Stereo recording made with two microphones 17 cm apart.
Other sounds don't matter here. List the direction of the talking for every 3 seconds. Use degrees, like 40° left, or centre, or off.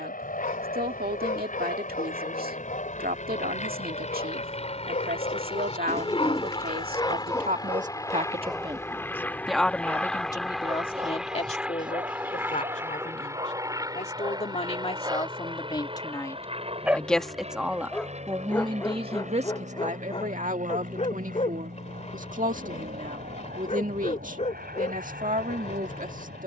60° right, 60° right, 50° right, 20° left, 40° left, 10° left, 40° right, 50° right, 50° right.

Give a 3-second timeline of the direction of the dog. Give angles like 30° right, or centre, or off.
50° left, 50° left, 20° left, 20° right, 30° right, 10° right, 20° left, 40° left, 40° left.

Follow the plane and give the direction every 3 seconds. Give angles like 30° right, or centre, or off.
50° left, 40° left, 20° left, centre, 20° right, 30° right, 40° right, 50° right, 50° right.